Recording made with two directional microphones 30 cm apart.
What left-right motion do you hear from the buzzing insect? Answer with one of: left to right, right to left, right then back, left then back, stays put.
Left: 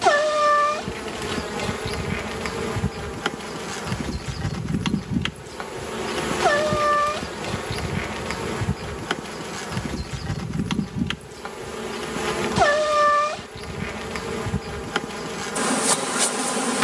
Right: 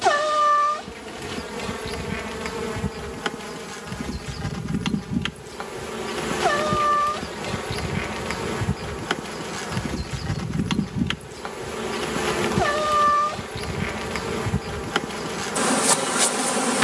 left to right.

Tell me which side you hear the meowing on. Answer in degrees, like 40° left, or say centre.
40° left.